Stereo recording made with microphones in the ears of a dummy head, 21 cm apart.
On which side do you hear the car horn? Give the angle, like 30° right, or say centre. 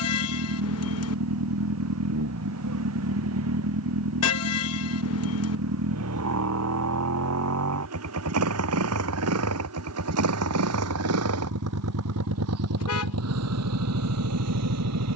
70° left.